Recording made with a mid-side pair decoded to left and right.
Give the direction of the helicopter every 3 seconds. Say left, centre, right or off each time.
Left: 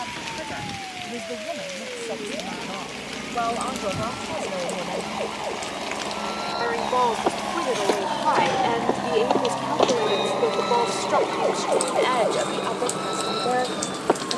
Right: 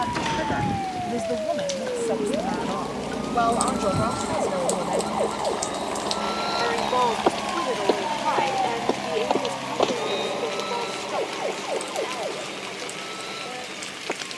right, right, centre, left, left.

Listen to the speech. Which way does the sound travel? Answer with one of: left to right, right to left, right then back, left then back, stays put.
right to left.